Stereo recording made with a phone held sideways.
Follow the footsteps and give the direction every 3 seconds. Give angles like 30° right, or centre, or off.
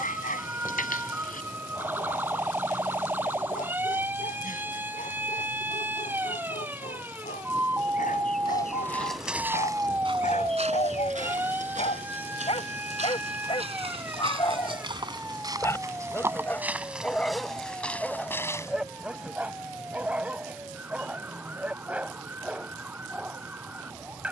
off, off, 20° left, 40° right, 50° right, 10° right, 20° left, off.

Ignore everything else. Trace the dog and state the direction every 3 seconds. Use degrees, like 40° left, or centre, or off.
70° left, 70° left, 70° left, 60° left, 40° left, 10° left, 10° right, 10° right.